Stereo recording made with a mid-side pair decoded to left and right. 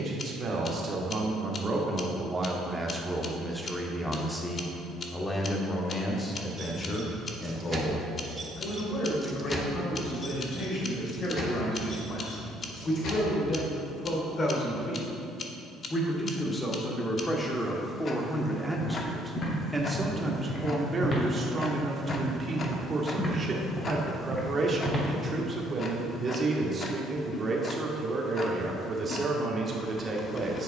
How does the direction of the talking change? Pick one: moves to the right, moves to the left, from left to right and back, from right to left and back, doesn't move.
from right to left and back.